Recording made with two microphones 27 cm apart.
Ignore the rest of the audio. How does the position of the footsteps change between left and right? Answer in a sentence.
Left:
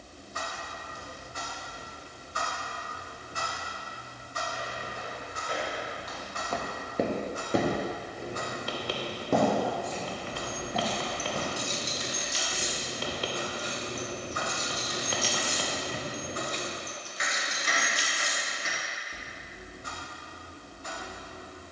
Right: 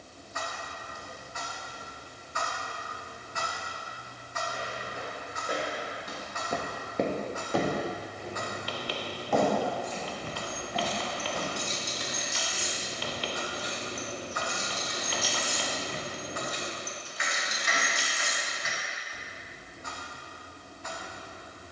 In this clip you hear the footsteps travel towards the left.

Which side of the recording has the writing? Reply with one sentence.
In this clip you hear the writing on the left.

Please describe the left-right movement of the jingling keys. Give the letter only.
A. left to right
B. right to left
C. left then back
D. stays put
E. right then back
C.